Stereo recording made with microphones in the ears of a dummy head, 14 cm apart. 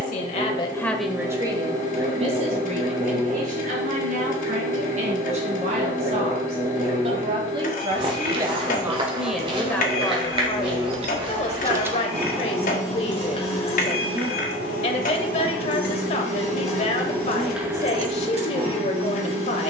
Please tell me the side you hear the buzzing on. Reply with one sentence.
In this clip you hear the buzzing on the right.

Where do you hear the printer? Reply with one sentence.
In this clip you hear the printer on the left.